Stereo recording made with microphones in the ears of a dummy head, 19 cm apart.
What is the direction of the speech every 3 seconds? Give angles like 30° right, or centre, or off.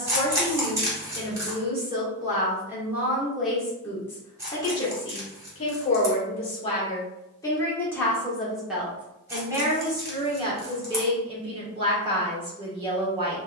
20° right, 10° left, 10° left, 20° right, 20° right.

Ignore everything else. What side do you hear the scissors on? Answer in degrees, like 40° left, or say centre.
10° right.